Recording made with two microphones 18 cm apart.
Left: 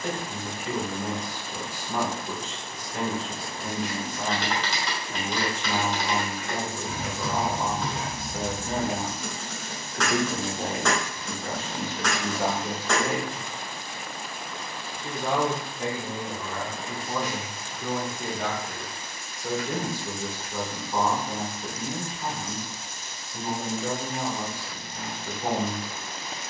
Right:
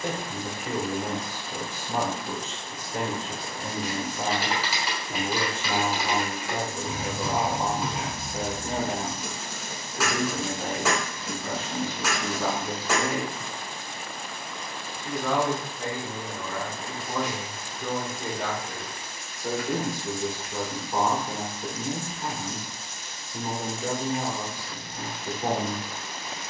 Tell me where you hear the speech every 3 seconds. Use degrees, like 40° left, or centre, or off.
20° right, 20° right, 20° right, 30° left, 50° left, 10° left, 10° right, 20° right, 20° right.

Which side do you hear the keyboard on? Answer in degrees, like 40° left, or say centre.
10° right.